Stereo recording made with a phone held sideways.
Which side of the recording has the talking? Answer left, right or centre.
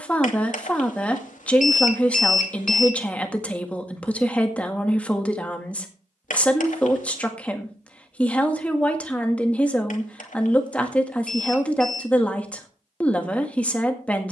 centre.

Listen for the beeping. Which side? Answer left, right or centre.
left.